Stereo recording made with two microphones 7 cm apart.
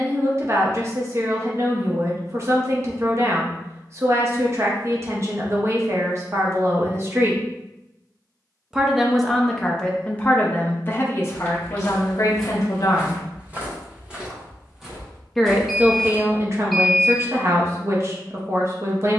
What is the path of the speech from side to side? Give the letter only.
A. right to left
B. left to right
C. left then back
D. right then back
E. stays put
C.